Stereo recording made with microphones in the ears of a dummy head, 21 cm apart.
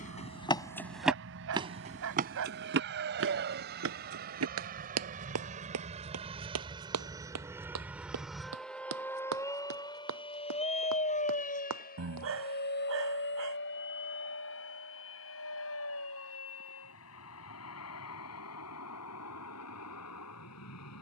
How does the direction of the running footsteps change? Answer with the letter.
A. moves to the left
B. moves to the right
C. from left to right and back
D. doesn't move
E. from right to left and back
B.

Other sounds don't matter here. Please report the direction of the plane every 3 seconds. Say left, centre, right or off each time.
right, right, centre, left, left, left, left.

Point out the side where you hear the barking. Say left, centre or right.
right.